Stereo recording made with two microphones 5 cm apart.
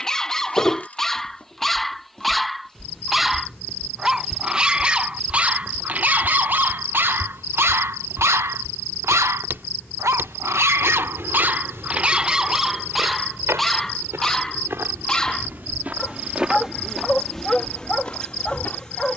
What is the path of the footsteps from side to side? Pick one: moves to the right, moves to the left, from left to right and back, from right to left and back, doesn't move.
from left to right and back.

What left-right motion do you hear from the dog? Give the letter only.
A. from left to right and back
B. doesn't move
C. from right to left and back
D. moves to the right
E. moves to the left
A.